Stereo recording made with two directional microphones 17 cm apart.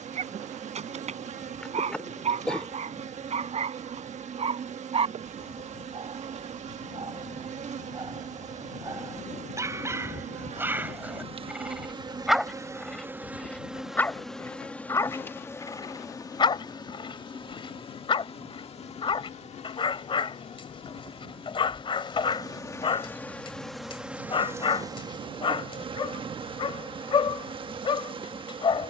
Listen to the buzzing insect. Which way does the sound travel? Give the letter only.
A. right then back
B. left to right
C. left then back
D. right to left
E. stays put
C.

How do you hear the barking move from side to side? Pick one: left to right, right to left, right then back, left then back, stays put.
right to left.